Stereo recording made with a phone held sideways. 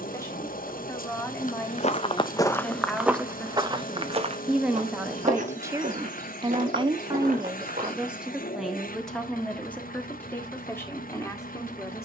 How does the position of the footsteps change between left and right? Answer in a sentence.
You can hear the footsteps move from left to right.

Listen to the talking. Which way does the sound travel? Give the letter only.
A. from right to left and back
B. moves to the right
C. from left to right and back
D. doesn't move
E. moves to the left
C.